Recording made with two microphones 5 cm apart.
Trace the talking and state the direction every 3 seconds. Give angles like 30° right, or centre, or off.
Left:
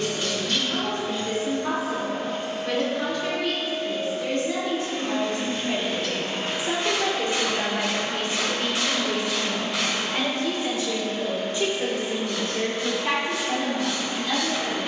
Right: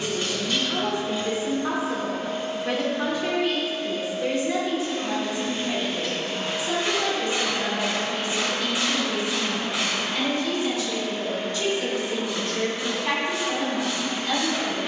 20° right, 10° right, 40° left, 30° left, centre.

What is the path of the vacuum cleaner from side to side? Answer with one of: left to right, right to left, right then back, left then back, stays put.
left to right.